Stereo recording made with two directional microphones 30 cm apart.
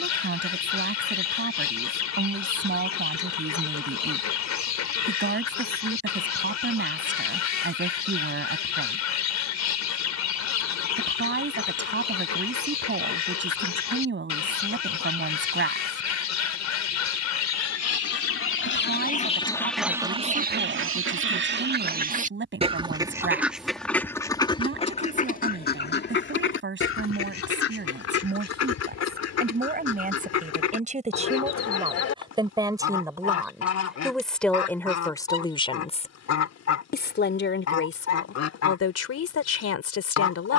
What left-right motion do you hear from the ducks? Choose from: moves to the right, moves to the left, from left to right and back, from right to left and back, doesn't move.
from left to right and back.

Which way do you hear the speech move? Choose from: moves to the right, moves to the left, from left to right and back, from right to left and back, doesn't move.
moves to the left.